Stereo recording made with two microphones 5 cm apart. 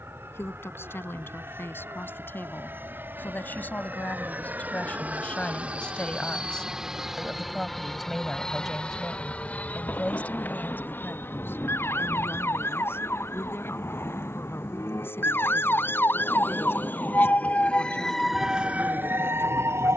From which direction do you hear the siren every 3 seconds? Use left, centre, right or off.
left, left, left, left, left, left, right.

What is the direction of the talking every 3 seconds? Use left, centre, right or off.
left, left, centre, left, left, left, left.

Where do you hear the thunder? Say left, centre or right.
left.